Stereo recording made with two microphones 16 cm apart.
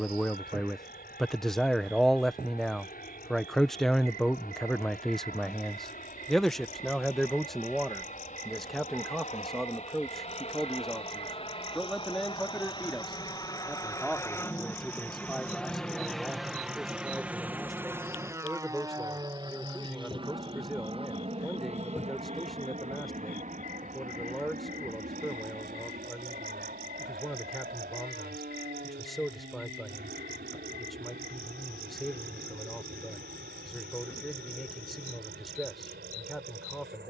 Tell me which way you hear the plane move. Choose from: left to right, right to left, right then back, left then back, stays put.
left to right.